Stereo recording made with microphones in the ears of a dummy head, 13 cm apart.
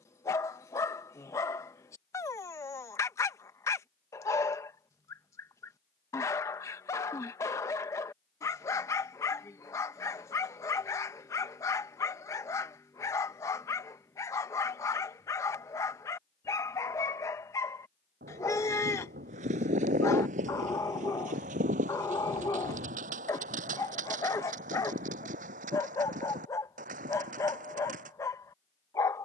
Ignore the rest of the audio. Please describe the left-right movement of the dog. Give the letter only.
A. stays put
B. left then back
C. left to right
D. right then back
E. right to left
A.